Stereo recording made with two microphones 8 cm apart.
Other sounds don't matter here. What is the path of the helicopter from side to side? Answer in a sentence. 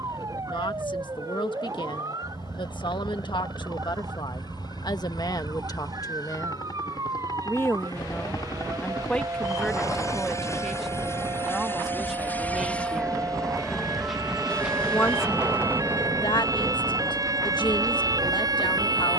In this clip you hear the helicopter go from the left side to the right.